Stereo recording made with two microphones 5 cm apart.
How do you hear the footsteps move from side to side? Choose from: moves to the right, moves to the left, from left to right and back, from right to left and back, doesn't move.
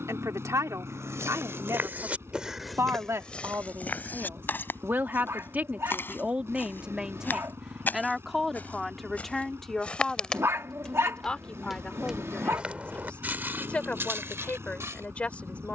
from right to left and back.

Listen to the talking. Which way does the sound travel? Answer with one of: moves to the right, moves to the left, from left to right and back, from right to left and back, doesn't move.
moves to the left.